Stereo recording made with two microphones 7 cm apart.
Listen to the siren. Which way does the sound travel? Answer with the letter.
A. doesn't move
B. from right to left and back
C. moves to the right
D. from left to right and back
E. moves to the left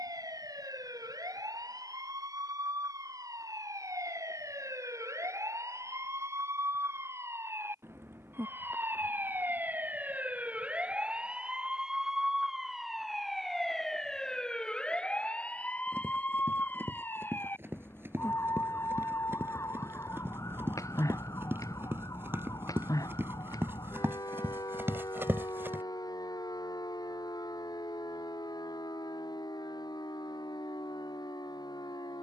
E.